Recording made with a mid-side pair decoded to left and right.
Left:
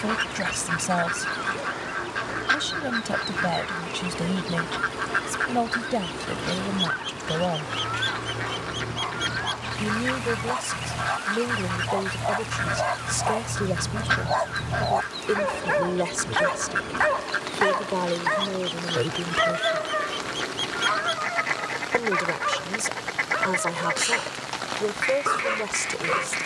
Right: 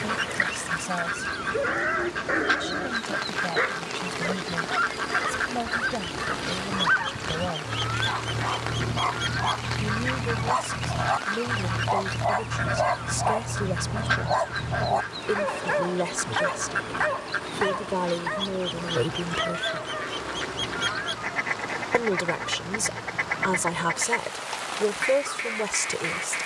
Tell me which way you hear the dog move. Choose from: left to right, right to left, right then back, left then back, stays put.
right to left.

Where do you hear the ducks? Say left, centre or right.
centre.